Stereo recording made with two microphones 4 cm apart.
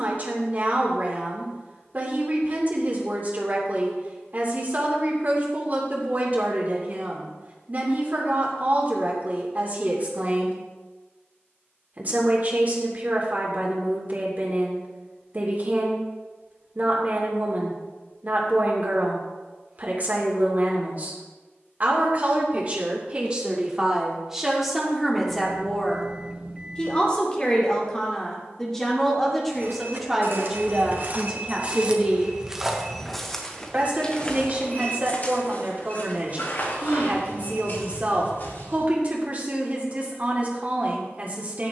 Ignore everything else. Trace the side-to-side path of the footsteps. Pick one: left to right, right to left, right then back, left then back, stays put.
right to left.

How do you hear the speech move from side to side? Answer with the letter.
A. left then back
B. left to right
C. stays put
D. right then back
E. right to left
A.